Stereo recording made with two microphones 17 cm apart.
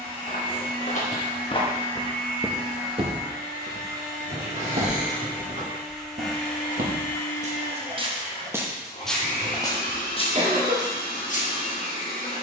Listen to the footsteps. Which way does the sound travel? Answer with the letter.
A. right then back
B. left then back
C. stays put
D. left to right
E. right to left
A.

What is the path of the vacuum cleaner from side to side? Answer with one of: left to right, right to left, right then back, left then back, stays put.
right to left.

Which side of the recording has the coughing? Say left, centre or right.
right.